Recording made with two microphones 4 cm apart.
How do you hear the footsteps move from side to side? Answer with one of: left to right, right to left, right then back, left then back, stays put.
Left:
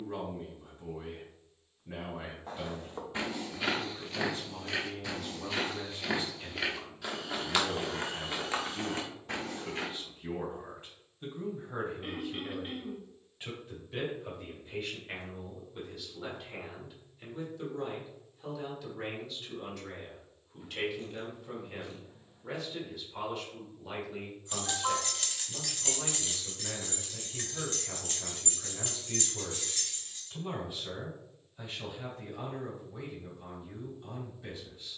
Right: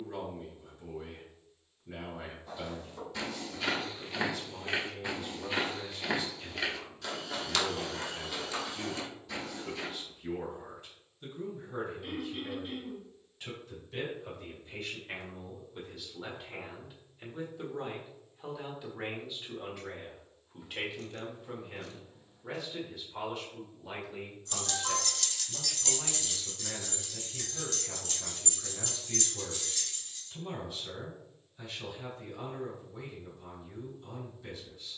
right then back.